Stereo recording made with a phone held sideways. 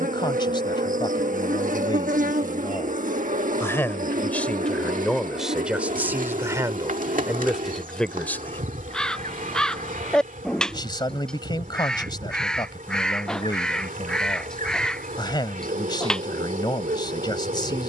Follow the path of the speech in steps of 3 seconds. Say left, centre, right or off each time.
left, centre, centre, left, left, left.